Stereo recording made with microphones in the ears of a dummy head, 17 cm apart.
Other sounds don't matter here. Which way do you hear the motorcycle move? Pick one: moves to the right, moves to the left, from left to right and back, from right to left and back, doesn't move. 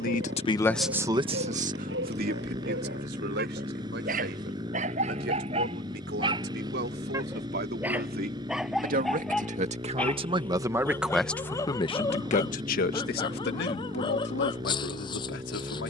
doesn't move.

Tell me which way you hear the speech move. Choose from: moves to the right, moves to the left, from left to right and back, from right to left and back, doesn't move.
from left to right and back.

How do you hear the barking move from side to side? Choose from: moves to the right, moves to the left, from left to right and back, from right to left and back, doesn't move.
moves to the left.